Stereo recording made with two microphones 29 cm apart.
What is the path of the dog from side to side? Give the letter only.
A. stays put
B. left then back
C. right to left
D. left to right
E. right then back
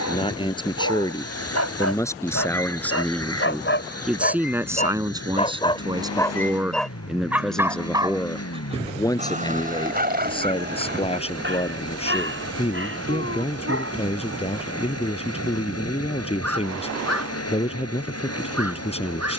D.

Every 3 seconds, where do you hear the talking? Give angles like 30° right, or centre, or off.
10° left, 10° right, centre, 20° left, 20° left, 20° left, 20° left.